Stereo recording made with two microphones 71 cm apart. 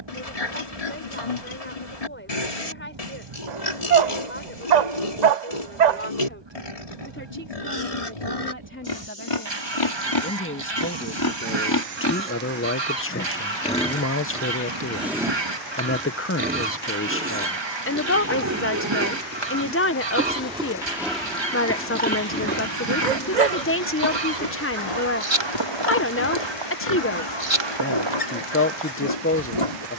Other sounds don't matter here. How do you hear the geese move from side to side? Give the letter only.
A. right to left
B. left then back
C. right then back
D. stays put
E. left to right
D.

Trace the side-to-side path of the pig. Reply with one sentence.
In this clip you hear the pig go right and come back.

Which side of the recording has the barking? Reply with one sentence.
In this clip you hear the barking on the right.